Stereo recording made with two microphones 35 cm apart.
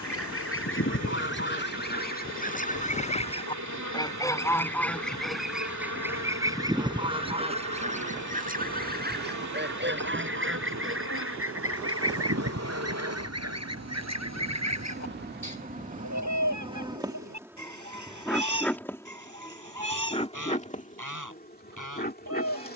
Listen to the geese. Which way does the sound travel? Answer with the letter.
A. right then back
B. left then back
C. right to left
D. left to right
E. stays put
D.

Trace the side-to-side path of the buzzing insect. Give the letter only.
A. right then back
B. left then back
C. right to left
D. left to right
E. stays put
C.